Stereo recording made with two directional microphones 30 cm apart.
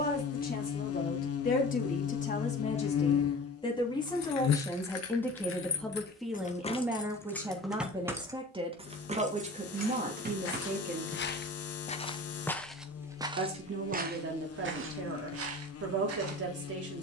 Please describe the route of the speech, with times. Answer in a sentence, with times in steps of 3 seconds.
In this clip you hear the speech on the left from 0 s, in the centre from 3 s and on the right from 9 s.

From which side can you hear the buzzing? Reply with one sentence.
You can hear the buzzing on the left.